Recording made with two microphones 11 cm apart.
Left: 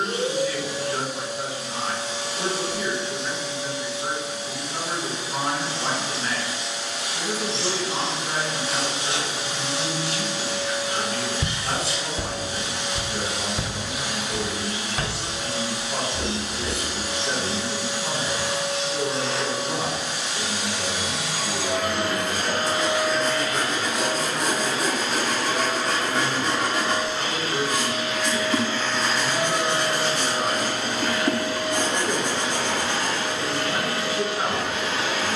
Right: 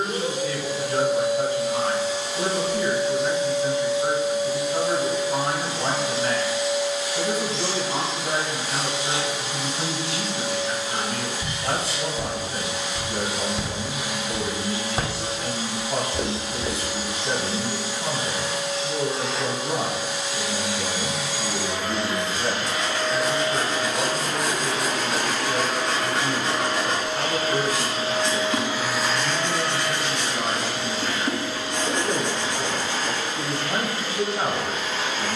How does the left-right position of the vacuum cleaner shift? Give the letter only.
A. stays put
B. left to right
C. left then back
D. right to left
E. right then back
E.